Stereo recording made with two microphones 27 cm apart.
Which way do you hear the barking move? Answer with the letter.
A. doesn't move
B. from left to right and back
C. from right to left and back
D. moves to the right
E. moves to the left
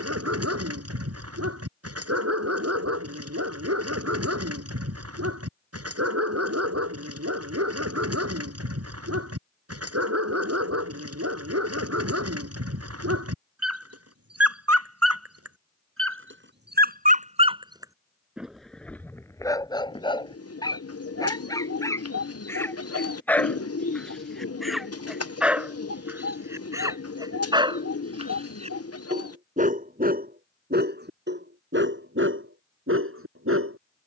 C.